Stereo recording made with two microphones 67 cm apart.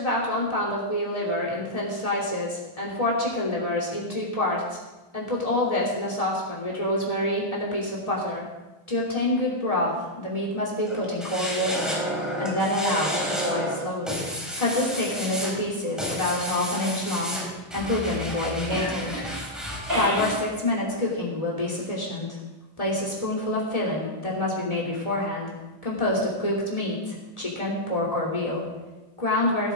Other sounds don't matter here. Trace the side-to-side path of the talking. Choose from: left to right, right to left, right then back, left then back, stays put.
stays put.